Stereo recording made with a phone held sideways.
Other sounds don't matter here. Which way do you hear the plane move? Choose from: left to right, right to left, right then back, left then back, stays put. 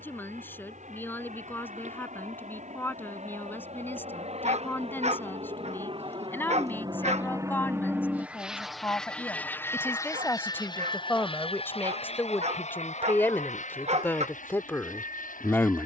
right to left.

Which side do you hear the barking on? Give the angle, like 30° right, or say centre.
50° right.